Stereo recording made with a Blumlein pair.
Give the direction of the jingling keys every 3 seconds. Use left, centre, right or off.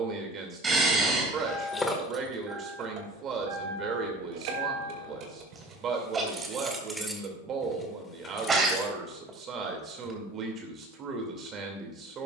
centre, right, centre, off.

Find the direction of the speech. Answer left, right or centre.
right.